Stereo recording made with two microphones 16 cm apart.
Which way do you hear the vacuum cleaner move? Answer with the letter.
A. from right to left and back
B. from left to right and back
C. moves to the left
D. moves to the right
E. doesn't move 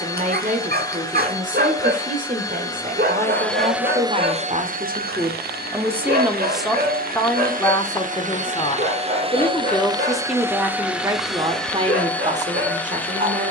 B.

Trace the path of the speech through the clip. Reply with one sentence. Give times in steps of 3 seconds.
You can hear the speech on the right from 0 s, in the centre from 6 s and on the right from 12 s.